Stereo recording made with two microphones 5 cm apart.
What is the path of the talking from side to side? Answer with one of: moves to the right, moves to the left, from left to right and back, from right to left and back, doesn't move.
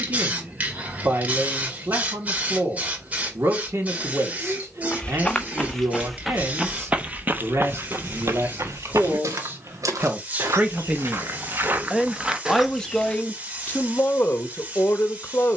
moves to the left.